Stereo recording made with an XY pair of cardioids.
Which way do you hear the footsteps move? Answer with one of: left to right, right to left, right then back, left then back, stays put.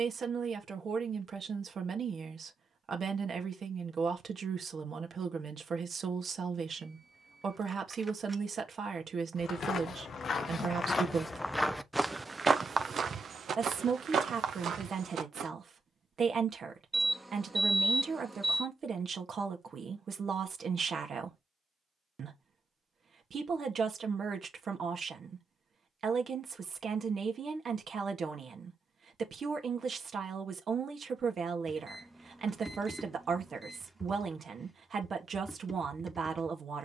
left to right.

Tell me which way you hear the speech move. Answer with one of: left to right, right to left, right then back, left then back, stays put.
stays put.